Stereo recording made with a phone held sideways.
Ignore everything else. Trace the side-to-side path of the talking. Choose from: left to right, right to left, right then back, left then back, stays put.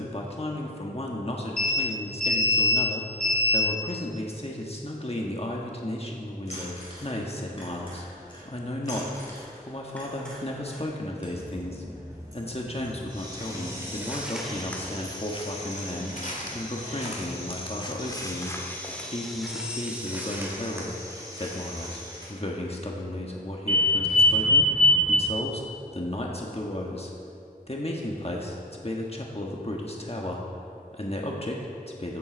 stays put.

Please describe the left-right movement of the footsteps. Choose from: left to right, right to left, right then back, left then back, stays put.
left then back.